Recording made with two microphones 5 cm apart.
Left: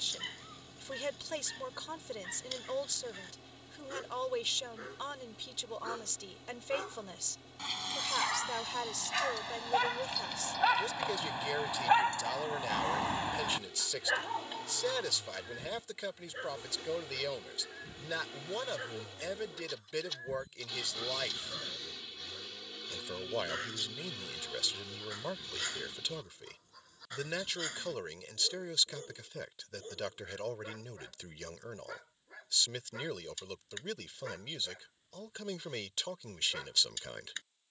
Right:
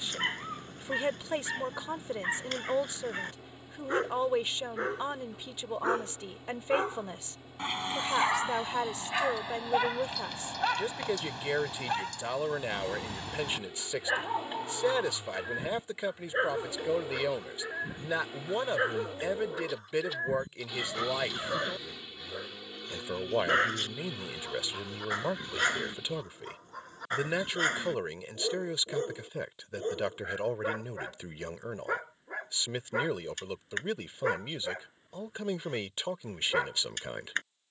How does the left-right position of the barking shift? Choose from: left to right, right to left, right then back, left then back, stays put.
left then back.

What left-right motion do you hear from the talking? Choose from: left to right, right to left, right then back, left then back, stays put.
stays put.